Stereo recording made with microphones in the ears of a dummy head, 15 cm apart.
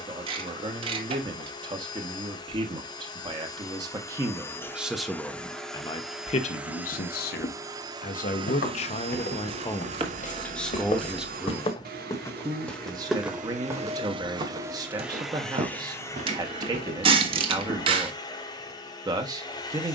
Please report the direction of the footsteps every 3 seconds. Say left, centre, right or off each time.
off, off, left, left, centre, right, off.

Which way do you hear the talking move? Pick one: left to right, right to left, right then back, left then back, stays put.
left then back.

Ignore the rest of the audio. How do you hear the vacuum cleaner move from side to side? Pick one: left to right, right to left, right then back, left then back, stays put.
right then back.